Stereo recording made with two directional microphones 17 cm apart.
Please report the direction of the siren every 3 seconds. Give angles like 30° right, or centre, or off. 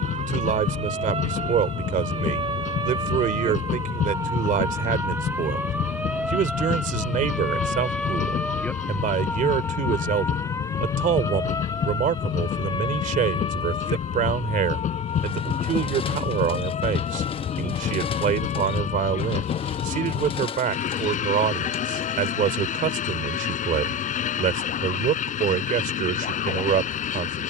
40° right, 20° right, centre, 20° left, 30° left, 40° left, 50° left, 50° left, 50° left.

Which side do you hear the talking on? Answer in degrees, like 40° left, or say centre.
50° right.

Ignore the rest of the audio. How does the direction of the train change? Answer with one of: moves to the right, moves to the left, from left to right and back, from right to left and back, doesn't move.
doesn't move.